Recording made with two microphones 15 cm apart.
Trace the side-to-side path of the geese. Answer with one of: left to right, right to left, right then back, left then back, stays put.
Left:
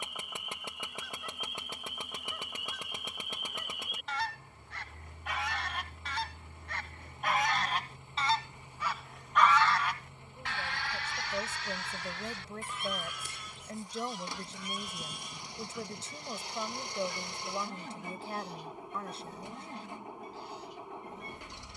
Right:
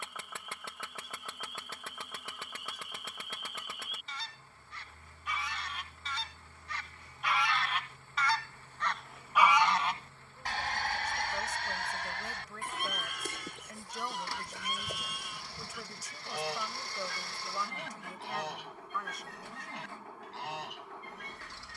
left to right.